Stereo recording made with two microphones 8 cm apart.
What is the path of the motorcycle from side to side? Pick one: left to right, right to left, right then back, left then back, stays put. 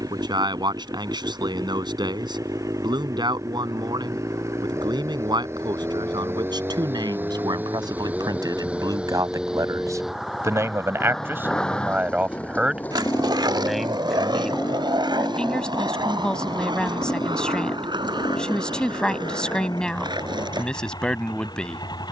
right to left.